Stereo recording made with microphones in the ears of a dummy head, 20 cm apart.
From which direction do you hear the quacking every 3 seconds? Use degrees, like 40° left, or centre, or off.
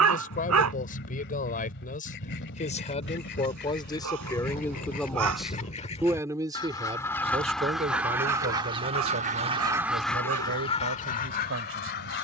50° left, 40° left, centre, 10° left.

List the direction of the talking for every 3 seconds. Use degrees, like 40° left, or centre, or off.
40° left, 10° left, 30° right, 60° right.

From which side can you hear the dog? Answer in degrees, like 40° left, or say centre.
70° right.